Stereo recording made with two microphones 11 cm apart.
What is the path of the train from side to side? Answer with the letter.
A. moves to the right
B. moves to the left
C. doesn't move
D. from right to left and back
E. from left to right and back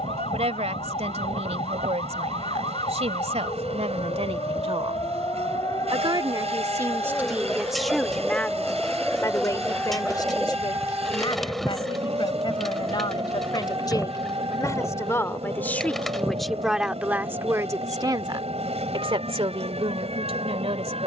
C.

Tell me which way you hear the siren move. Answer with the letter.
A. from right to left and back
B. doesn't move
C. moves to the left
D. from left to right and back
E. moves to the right
E.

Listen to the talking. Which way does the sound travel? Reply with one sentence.
In this clip you hear the talking move from right to left and back again.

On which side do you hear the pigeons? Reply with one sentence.
In this clip you hear the pigeons in the centre.